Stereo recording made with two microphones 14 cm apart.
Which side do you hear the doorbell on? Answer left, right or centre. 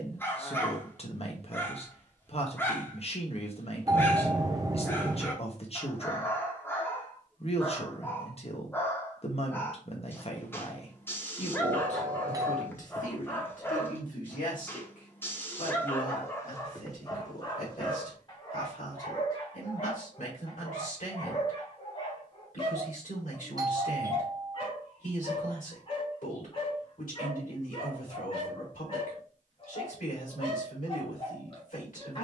right.